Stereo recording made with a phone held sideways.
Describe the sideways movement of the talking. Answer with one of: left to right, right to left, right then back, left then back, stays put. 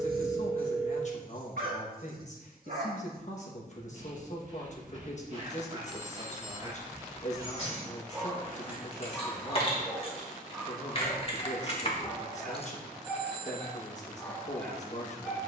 stays put.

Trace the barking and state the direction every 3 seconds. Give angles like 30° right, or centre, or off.
70° right, 50° right, 20° right, centre, 10° left.